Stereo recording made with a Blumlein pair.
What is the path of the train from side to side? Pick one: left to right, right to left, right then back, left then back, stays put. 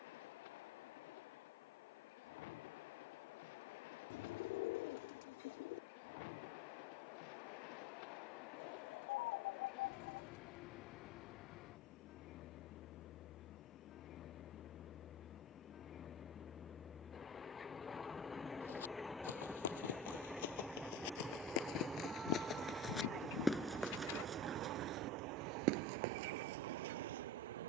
left to right.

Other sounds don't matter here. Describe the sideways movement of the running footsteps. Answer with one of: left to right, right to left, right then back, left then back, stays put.
left to right.